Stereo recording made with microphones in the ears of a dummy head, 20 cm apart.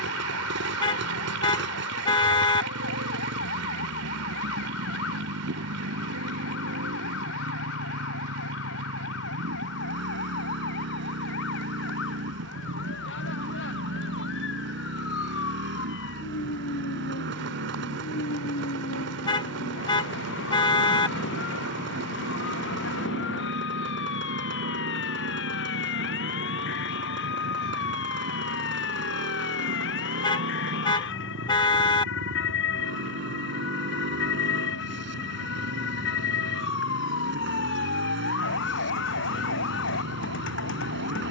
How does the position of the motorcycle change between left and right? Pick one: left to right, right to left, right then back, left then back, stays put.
stays put.